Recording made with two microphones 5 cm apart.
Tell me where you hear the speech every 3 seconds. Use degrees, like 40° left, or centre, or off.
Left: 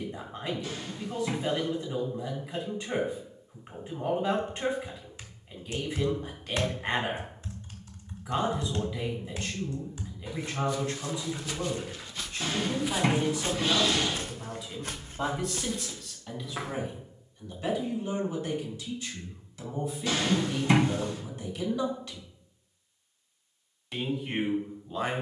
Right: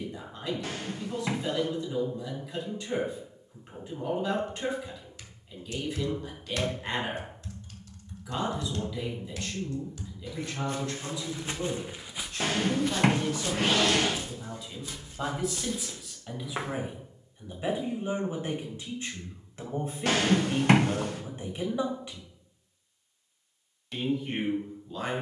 20° left, 20° left, 20° left, 20° left, 10° left, 10° right, 30° right, 20° right, 10° left.